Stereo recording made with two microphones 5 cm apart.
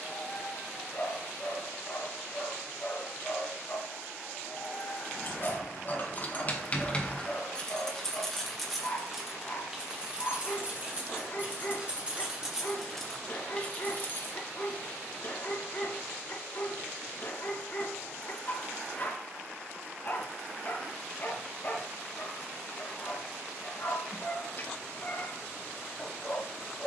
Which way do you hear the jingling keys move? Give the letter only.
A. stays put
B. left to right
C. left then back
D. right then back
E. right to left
D.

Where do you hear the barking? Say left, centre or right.
left.